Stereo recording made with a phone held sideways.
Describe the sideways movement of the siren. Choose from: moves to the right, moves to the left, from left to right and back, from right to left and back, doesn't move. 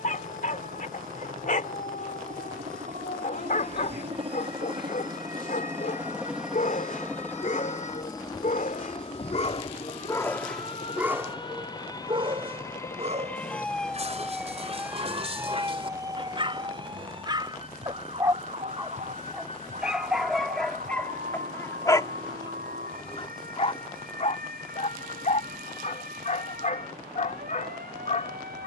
moves to the right.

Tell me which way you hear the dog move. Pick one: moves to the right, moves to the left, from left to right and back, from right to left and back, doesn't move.
from left to right and back.